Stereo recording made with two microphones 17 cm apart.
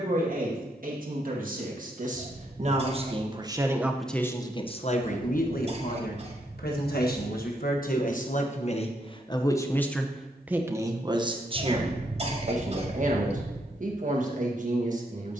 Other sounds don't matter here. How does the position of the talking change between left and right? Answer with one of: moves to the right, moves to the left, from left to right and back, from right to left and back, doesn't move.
from right to left and back.